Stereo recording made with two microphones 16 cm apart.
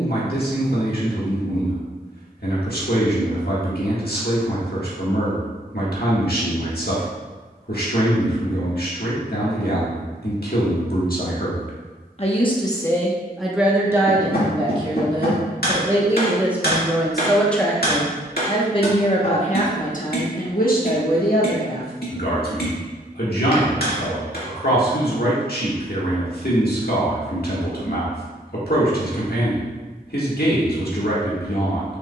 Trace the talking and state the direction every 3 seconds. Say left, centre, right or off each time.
left, left, left, left, centre, centre, left, left, left, left, left.